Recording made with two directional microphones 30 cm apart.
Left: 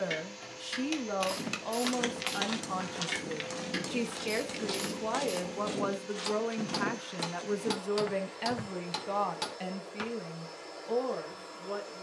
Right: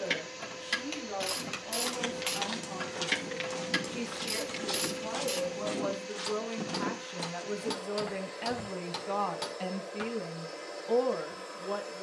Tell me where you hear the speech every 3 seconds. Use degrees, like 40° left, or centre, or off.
60° left, 50° left, 20° left, 10° right.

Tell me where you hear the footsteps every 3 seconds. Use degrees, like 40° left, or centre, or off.
20° left, 10° right, 10° left, off.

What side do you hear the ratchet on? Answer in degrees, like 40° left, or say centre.
40° right.